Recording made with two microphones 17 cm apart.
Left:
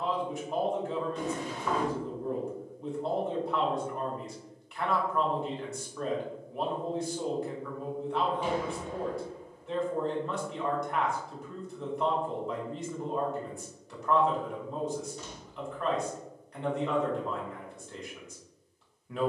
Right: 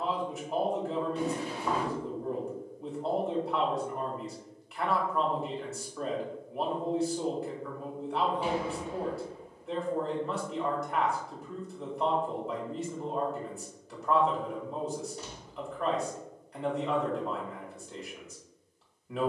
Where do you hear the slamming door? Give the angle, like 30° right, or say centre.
10° right.